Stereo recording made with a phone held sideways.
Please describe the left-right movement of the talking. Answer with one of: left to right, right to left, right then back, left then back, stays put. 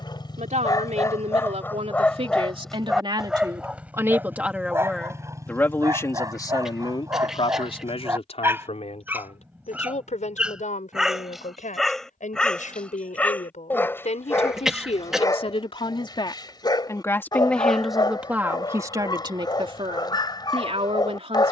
left then back.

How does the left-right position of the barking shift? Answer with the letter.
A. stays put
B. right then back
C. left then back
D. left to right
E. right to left
B.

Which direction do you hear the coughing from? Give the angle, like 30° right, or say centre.
centre.